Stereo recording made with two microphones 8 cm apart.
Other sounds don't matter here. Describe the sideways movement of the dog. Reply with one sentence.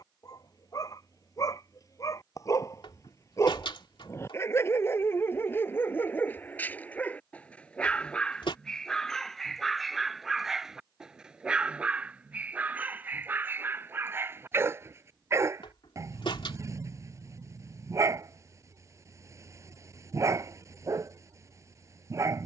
You can hear the dog move from left to right.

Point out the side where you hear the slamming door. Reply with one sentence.
In this clip you hear the slamming door on the left.